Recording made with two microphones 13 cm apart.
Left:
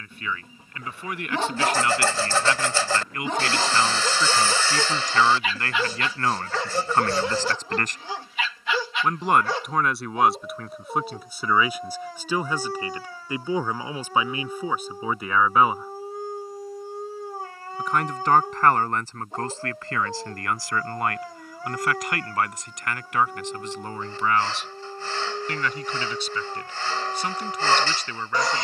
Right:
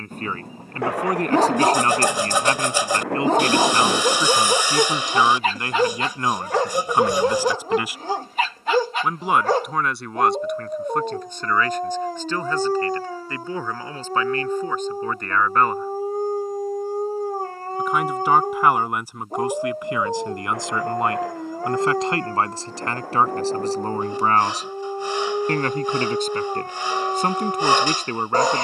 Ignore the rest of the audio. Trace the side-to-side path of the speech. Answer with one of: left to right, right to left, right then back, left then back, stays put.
left then back.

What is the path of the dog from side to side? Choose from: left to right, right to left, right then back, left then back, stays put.
stays put.